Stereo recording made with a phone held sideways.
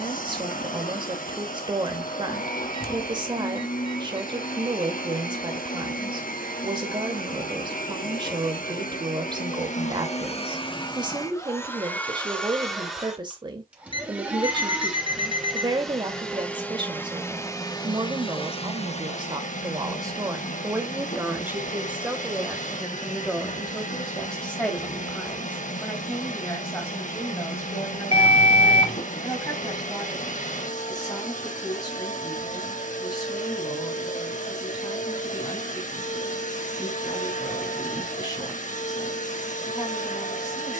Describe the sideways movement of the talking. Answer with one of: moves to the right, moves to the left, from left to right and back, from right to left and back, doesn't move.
moves to the left.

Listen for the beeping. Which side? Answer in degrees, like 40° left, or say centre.
30° left.